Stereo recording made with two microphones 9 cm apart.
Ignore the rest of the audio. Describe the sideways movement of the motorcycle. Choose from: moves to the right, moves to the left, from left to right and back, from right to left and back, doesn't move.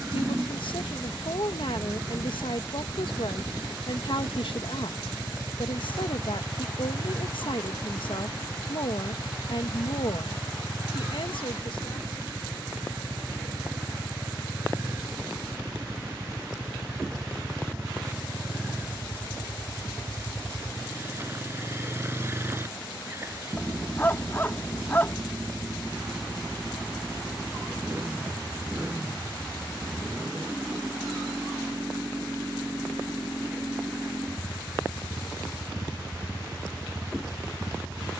doesn't move.